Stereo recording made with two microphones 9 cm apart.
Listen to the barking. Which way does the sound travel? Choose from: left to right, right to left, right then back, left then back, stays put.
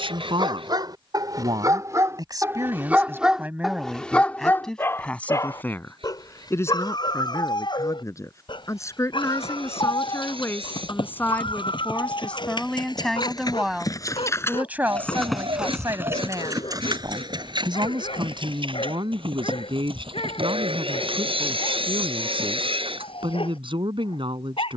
right to left.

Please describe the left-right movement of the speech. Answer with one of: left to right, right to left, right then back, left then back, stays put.
left then back.